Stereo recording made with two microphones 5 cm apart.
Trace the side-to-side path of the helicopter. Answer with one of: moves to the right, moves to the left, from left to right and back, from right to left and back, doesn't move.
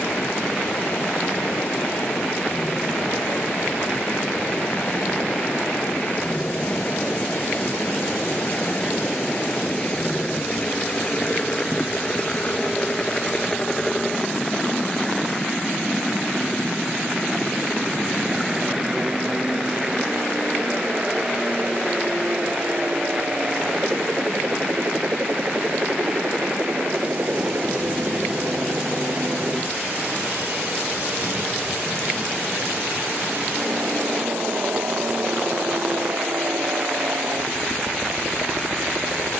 moves to the right.